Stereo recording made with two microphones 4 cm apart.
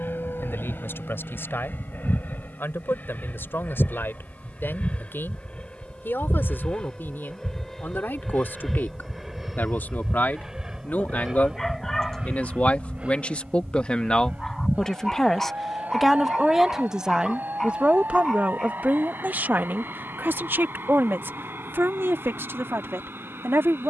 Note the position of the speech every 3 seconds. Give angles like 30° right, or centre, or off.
60° left, 60° left, 60° left, 50° left, 30° left, 10° right, 50° right, 70° right.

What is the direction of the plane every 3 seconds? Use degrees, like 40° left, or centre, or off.
50° left, 30° left, 10° left, 10° right, 30° right, 40° right, 50° right, 50° right.